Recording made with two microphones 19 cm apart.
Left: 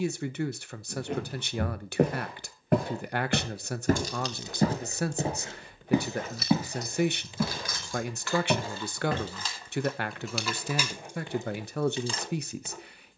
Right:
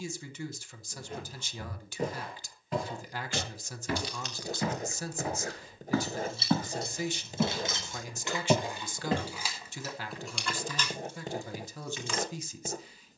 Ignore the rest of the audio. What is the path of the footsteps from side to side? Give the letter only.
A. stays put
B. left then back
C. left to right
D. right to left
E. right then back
C.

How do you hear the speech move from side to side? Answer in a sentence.
In this clip you hear the speech stay in one place.